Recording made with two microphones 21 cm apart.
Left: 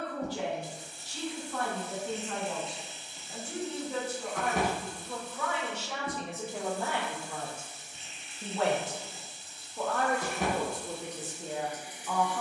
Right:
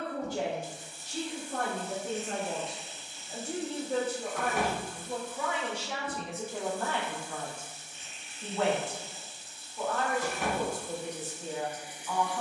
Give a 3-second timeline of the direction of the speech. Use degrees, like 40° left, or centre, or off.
50° right, 30° right, 20° left, 60° left.